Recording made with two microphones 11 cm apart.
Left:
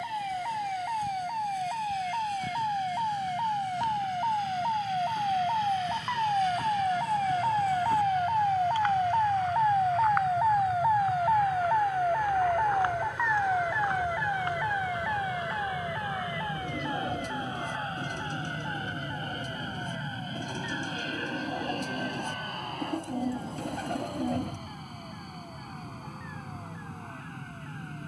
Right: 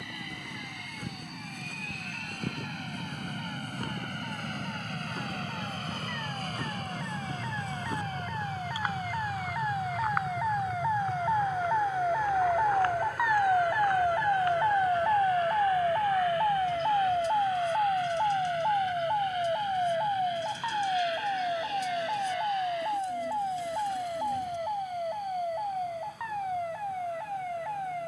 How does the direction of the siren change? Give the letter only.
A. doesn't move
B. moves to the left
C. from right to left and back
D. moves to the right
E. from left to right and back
D.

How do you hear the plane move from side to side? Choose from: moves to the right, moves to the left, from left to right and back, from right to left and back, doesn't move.
moves to the left.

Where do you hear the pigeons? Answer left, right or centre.
left.